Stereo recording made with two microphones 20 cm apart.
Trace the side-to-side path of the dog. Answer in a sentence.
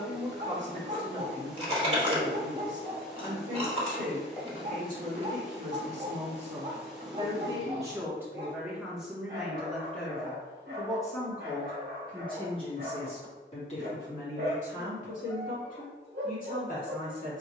In this clip you hear the dog stay in one place.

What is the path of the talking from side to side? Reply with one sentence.
In this clip you hear the talking go from the right side to the left.